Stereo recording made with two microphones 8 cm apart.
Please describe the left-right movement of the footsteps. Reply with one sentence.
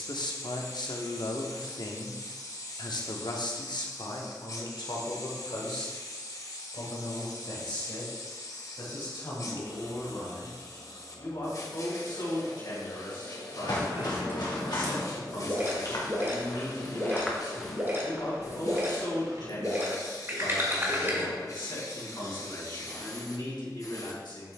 You can hear the footsteps go from the left side to the right.